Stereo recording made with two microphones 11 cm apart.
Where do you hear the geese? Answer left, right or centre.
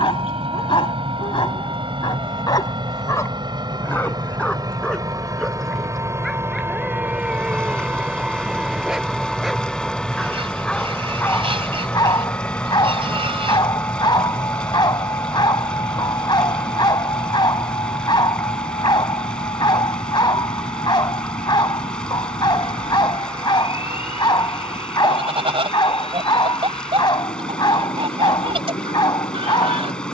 right.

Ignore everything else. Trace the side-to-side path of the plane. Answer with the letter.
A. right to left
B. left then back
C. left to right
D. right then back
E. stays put
A.